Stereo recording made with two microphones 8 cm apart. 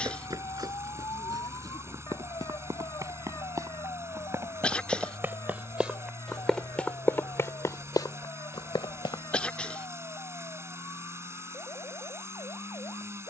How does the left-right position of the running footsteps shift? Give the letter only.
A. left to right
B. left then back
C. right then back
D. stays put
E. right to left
E.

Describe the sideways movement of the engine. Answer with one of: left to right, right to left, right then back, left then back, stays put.
stays put.